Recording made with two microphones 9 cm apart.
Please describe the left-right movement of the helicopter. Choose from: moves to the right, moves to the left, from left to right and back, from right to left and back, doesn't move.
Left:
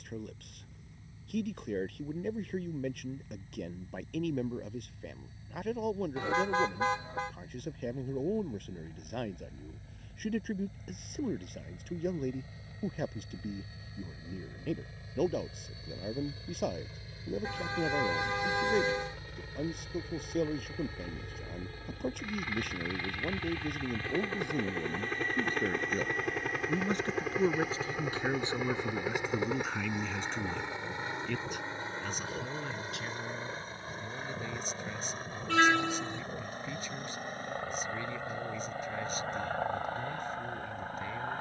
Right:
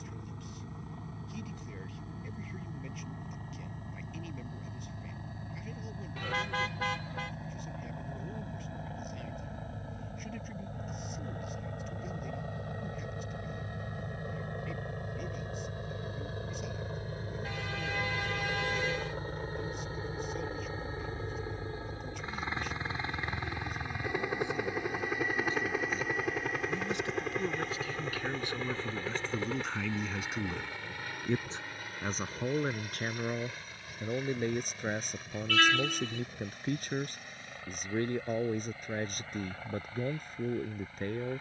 moves to the left.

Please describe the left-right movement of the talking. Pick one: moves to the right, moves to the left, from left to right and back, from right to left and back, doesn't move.
moves to the right.